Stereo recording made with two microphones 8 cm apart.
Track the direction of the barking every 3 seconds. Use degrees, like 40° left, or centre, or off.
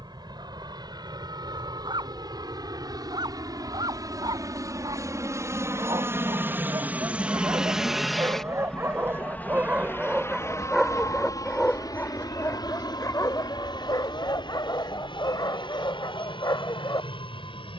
70° right, 60° right, 40° right, 10° right, 40° left, 50° left.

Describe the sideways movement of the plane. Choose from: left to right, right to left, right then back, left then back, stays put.
right to left.